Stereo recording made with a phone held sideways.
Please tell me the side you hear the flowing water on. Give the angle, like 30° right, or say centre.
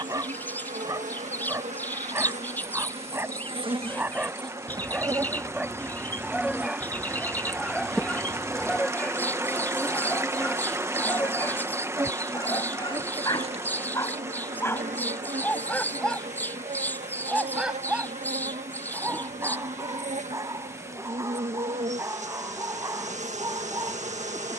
20° right.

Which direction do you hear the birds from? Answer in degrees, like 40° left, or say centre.
10° left.